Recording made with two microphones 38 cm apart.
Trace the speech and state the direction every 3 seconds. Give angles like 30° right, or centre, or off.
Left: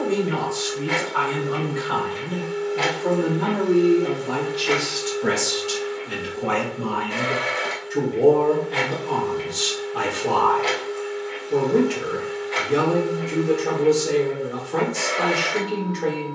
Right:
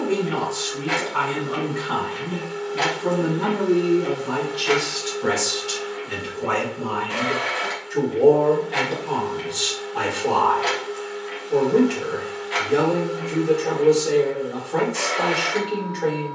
40° right, 20° right, 10° left, 10° left, 10° left, 10° left.